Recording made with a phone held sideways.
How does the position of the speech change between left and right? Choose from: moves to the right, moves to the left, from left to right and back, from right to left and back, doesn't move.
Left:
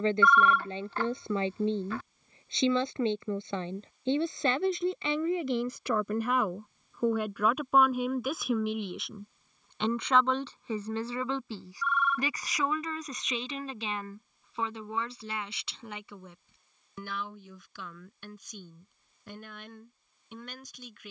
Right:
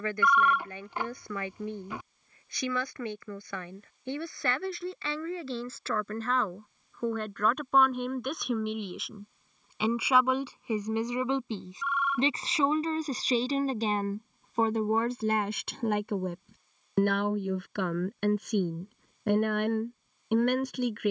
moves to the right.